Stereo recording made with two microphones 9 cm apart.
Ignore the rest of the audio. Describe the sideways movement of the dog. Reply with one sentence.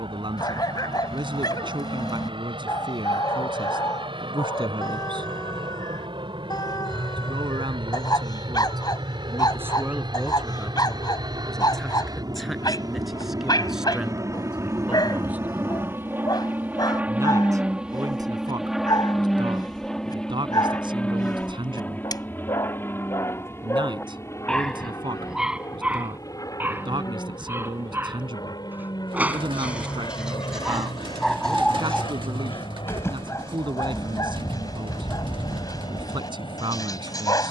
You can hear the dog move from left to right and back again.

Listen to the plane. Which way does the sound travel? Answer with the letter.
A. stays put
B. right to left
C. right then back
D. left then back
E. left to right
B.